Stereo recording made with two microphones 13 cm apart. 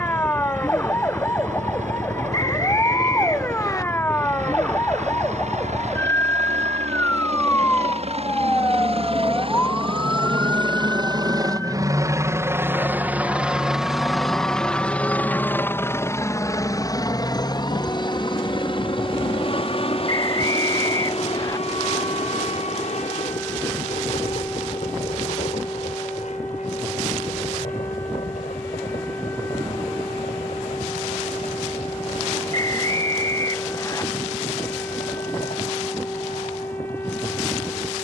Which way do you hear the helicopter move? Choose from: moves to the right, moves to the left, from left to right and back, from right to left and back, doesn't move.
moves to the left.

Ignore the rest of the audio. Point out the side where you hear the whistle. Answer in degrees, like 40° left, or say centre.
30° left.